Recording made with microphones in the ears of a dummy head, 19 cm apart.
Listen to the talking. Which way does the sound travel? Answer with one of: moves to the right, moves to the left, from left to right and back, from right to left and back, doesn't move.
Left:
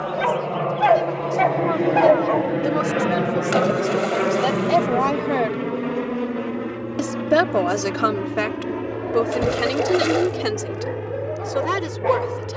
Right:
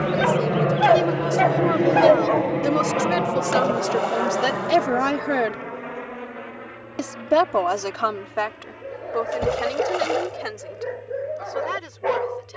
moves to the left.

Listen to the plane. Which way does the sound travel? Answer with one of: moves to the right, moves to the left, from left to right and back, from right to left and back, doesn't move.
moves to the left.